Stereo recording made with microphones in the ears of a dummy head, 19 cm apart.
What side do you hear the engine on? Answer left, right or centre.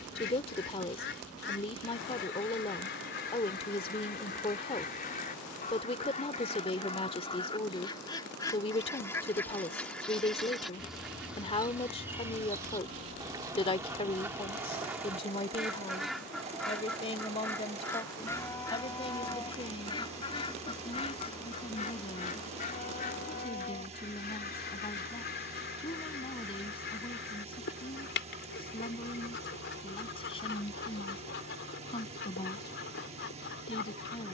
right.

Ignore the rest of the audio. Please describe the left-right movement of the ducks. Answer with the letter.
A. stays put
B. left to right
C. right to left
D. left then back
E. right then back
E.